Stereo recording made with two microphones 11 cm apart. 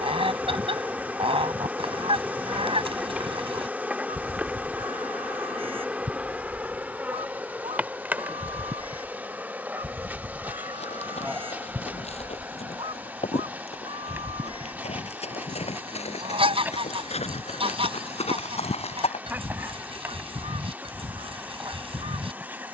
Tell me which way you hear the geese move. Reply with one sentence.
You can hear the geese stay in one place.